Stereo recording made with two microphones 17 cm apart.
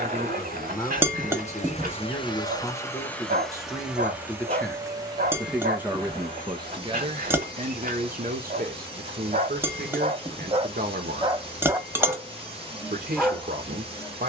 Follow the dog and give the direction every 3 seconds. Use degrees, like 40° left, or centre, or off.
50° right, 50° right, 50° right, 30° right, centre.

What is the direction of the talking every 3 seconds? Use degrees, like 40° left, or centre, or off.
20° left, 10° left, 40° right, 60° right, 60° right.